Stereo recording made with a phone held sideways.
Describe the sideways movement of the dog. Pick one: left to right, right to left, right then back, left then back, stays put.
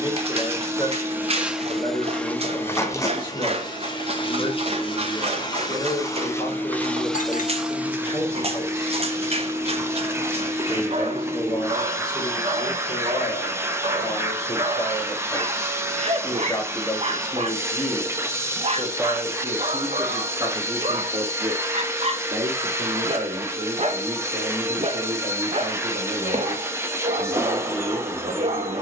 stays put.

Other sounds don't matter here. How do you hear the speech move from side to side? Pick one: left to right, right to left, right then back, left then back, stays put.
left to right.